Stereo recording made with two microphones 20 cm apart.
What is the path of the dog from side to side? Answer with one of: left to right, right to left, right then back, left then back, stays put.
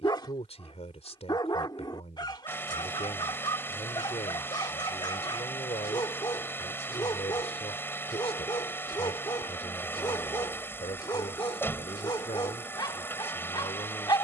stays put.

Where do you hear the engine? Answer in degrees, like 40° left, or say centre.
10° left.